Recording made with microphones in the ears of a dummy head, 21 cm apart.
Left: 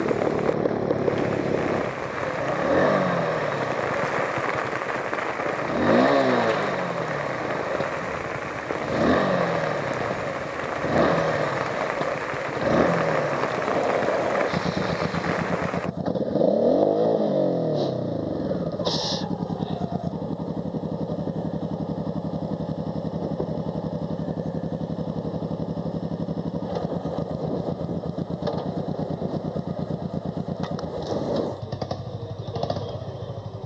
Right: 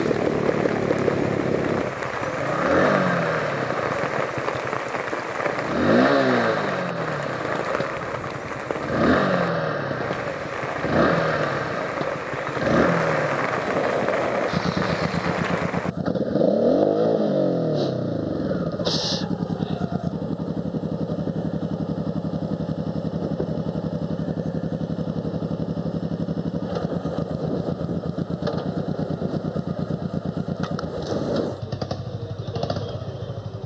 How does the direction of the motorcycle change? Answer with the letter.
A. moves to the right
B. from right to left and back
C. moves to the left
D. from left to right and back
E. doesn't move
E.